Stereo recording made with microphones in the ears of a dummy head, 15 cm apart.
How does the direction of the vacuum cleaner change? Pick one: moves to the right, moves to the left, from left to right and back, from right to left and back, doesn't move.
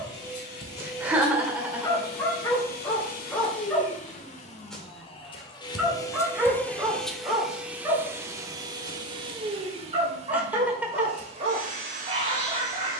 moves to the right.